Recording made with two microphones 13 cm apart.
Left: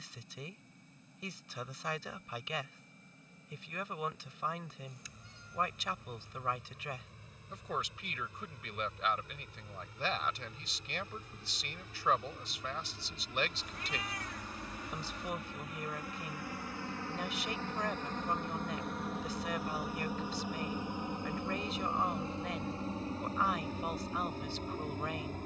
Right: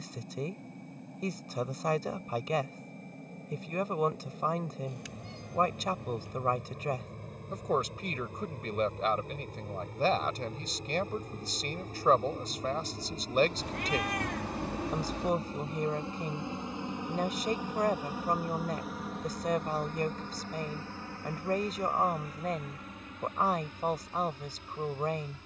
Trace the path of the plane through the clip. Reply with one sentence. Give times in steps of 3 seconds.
In this clip you hear the plane on the right from 0 s, in the centre from 18 s and on the left from 21 s.